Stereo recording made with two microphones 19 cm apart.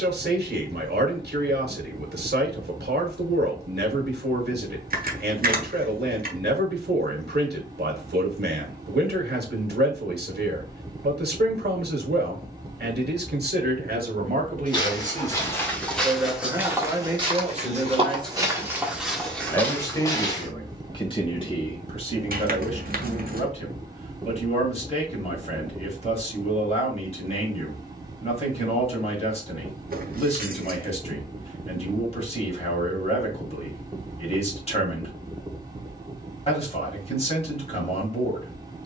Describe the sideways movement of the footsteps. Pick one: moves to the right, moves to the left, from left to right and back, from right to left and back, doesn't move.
from left to right and back.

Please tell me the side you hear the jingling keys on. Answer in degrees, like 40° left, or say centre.
50° right.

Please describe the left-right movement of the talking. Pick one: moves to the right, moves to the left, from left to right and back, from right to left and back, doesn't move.
moves to the left.